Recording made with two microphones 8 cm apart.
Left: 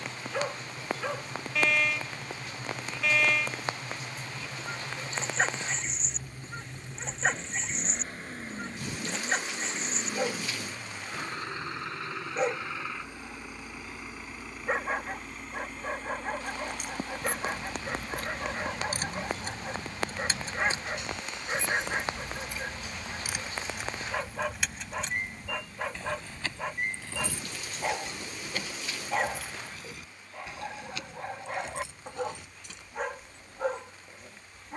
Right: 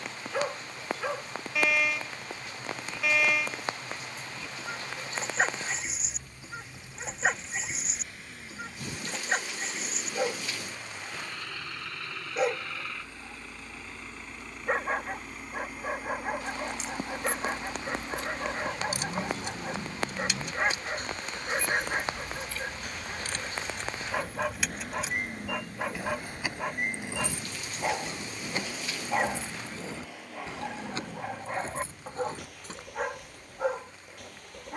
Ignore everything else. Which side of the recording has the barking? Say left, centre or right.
centre.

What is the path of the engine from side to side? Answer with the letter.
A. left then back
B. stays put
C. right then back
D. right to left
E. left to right
E.